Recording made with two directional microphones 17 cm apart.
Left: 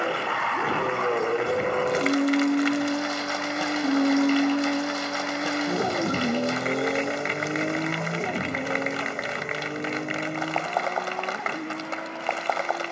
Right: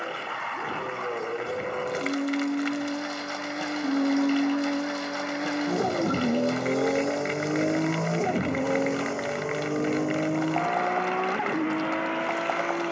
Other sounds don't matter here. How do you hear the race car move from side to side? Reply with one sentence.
You can hear the race car move from left to right.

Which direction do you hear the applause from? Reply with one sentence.
You can hear the applause on the left.